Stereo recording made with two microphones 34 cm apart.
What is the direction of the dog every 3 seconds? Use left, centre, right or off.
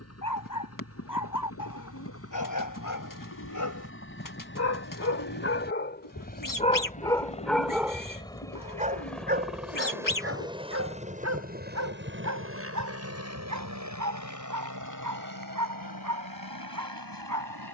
left, left, centre, right, right, right.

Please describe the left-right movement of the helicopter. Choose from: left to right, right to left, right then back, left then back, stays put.
left to right.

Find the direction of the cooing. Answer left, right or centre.
left.